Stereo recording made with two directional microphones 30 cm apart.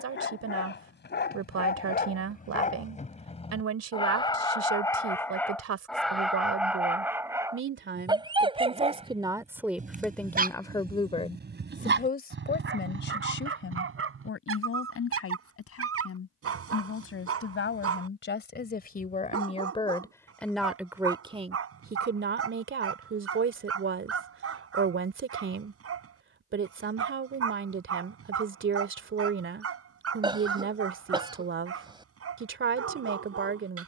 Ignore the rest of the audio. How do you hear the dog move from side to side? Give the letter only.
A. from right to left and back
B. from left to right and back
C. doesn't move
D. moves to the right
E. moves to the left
D.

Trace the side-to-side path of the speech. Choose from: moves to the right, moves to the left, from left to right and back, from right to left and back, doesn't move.
from right to left and back.